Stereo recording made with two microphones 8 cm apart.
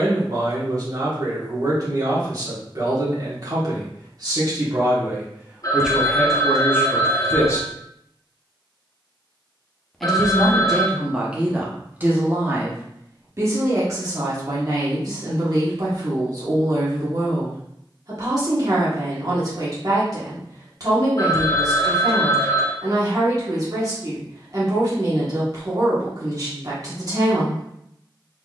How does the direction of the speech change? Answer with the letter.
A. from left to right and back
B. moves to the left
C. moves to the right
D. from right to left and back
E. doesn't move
D.